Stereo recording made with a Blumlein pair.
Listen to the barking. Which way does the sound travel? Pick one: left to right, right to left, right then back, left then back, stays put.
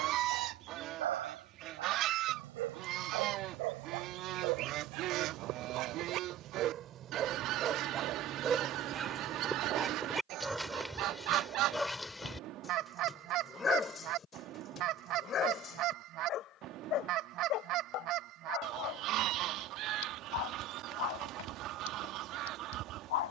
right to left.